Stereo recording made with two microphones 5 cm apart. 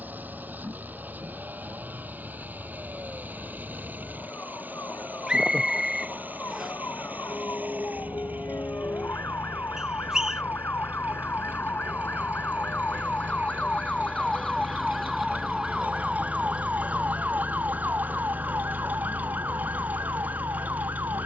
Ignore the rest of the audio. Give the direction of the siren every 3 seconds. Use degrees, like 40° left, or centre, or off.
80° left, 70° left, 70° left, 50° left, 30° left, 20° right, 50° right.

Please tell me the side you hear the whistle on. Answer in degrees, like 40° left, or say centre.
10° right.